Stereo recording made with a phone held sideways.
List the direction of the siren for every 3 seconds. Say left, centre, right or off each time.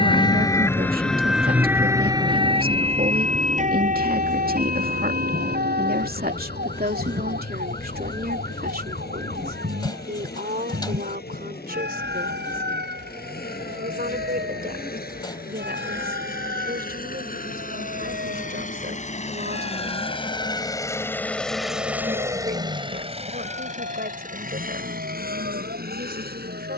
centre, right, right, right, right, right, right, right, right.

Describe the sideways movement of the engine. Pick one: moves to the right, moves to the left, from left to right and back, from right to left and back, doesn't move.
moves to the right.